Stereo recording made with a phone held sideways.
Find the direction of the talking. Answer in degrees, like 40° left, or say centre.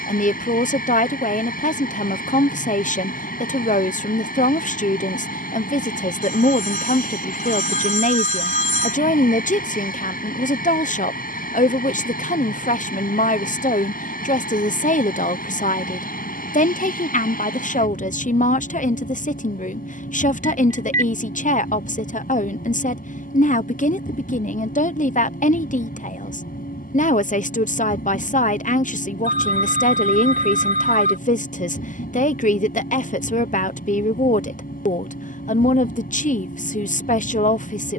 60° left.